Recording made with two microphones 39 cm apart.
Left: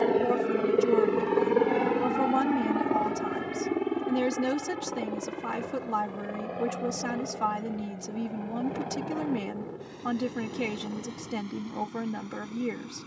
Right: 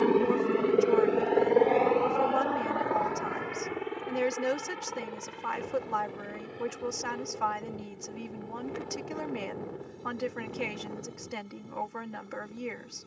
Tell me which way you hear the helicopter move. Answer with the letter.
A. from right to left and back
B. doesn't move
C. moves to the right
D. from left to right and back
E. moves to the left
E.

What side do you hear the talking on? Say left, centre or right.
left.